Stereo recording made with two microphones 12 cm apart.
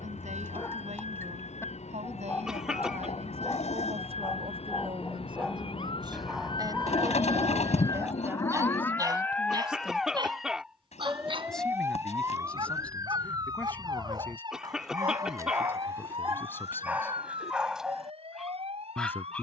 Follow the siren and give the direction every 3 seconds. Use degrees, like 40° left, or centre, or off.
70° left, 60° left, 30° left, centre, 30° right, 50° right, 50° right.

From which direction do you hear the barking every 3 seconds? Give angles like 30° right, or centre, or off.
20° left, 20° left, 10° right, 40° right, 40° right, 20° right, centre.